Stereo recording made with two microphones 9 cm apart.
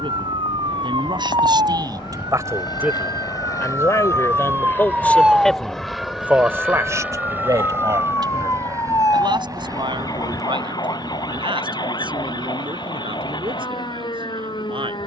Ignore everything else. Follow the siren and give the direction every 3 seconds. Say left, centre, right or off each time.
right, right, left, left, left.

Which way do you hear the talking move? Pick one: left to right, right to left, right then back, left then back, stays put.
left then back.